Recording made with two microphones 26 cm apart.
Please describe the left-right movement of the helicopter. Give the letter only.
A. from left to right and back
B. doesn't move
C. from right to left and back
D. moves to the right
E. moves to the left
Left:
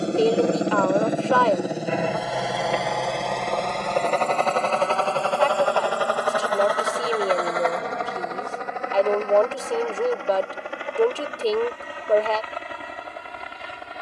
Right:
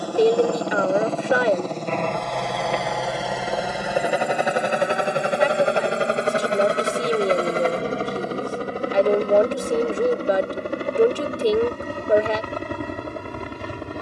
D.